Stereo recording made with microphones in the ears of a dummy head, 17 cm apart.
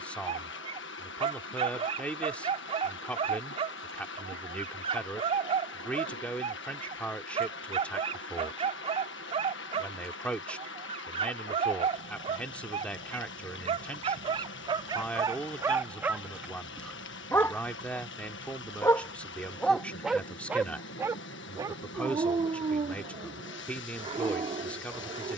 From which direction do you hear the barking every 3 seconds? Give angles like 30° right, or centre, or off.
30° right, 30° right, 30° right, 30° right, 30° right, 10° right, centre, 30° right, 30° right.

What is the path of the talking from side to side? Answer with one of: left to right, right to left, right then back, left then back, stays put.
stays put.